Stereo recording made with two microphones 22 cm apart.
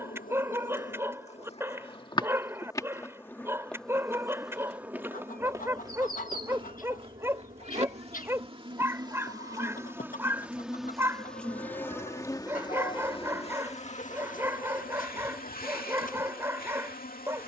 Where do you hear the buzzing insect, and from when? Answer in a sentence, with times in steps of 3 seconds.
In this clip you hear the buzzing insect on the left from 0 s, in the centre from 3 s, on the right from 6 s, in the centre from 9 s and on the left from 12 s.